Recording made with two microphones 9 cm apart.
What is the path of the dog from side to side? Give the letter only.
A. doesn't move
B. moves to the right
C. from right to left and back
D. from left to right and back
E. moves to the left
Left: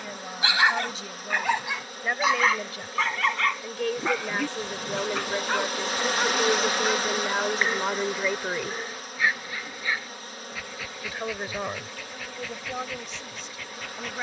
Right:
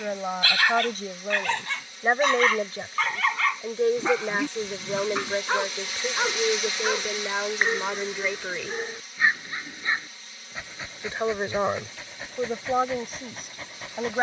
B.